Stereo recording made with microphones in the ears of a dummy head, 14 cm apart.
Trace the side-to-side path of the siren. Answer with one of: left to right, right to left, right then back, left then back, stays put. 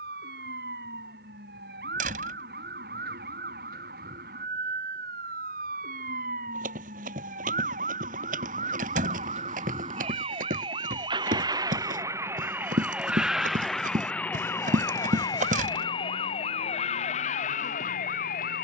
right to left.